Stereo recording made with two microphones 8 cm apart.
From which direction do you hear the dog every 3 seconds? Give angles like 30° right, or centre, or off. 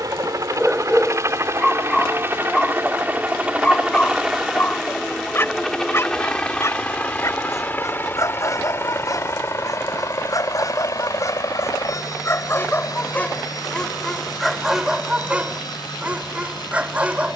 centre, 20° left, 40° left, 40° left, 10° left, 20° right.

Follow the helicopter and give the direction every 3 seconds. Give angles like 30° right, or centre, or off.
30° right, 10° right, 20° left, 40° left, 50° left, 50° left.